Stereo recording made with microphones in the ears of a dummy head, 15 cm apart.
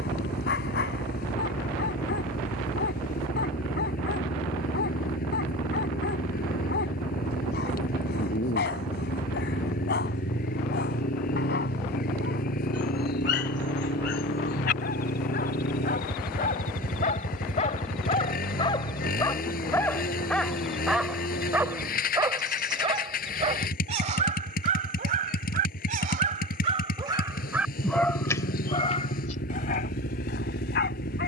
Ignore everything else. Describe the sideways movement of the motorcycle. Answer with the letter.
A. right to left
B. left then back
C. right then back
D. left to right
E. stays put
E.